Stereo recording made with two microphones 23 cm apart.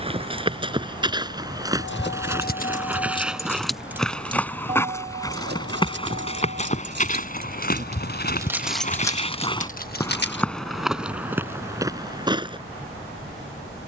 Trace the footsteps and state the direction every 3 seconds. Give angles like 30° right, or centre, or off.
20° right, 10° left, 40° left, centre, 20° right.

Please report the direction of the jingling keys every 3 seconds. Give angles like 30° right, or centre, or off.
40° left, 20° right, 40° right, 30° left, off.